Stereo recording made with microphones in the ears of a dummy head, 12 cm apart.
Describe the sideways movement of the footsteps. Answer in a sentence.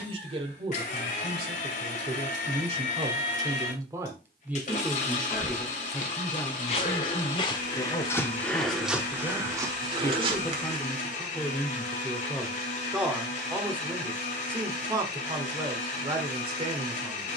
You can hear the footsteps go from the left side to the right.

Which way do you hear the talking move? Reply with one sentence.
You can hear the talking move from right to left and back again.